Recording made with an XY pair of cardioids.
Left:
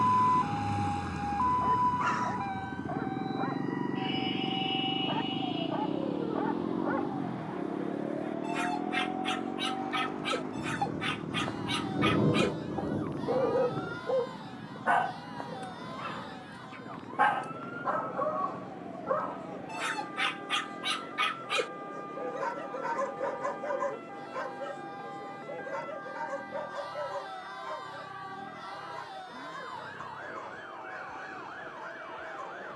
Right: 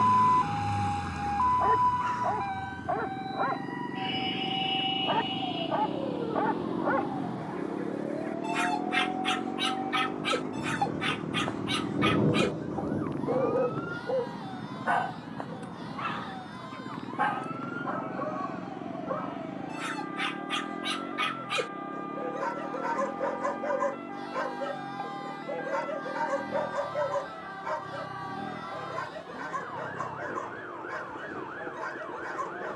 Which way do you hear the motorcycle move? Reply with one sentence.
In this clip you hear the motorcycle go from the left side to the right.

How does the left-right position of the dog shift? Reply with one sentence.
You can hear the dog go left and come back.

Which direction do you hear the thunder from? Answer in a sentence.
You can hear the thunder in the centre.